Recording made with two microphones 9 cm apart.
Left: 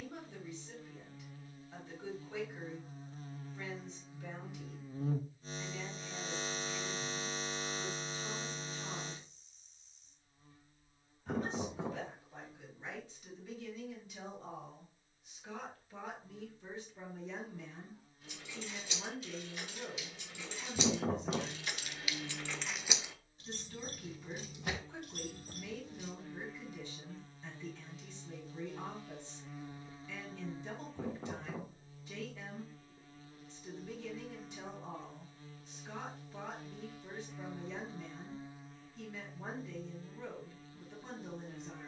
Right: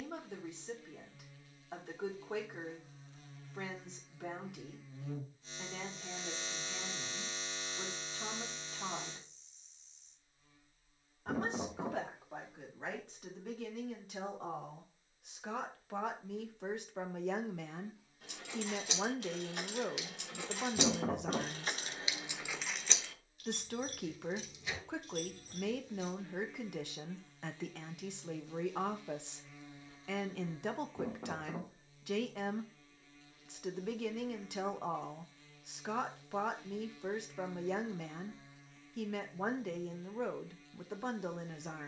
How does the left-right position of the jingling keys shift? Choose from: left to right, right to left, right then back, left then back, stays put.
right to left.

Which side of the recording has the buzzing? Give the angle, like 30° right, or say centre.
40° left.